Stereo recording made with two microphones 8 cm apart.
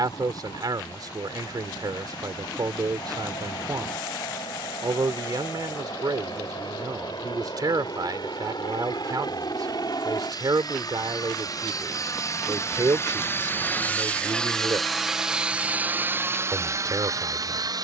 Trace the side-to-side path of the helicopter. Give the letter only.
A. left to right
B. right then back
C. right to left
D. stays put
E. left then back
A.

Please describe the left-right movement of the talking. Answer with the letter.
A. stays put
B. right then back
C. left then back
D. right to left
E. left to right
A.